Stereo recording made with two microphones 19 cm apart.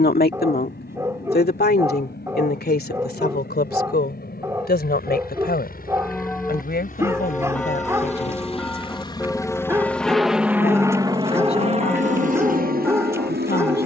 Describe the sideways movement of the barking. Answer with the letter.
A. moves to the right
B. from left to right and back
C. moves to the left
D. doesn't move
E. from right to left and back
D.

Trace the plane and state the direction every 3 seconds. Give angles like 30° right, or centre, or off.
70° left, 60° left, 40° left, 10° right, 50° right.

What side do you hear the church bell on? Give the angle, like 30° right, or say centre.
10° left.